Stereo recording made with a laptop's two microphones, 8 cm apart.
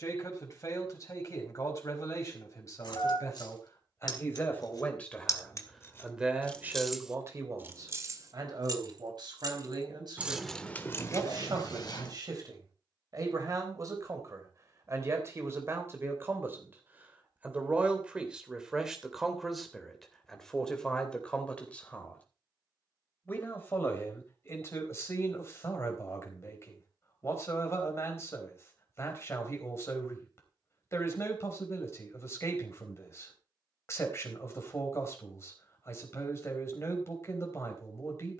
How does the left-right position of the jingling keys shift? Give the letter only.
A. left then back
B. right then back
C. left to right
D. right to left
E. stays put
B.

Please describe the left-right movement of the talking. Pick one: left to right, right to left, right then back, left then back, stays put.
right then back.